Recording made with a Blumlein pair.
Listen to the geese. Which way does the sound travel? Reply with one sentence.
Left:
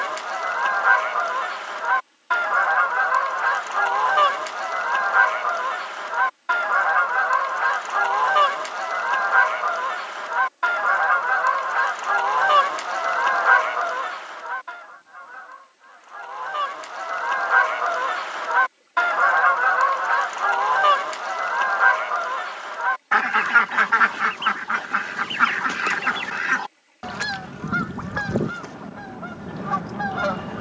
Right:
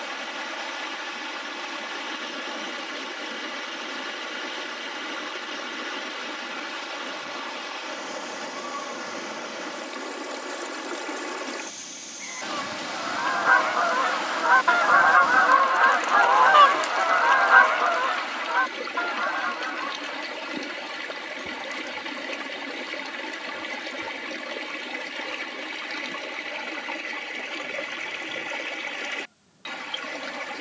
You can hear the geese move from left to right and back again.